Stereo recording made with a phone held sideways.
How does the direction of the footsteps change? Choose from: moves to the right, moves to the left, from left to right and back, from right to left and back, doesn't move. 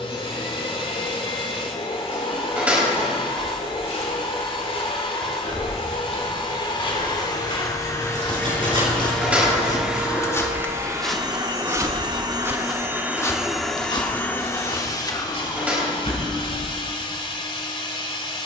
from left to right and back.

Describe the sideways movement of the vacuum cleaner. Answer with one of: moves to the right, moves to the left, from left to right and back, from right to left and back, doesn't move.
from left to right and back.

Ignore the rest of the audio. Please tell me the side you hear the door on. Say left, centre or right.
centre.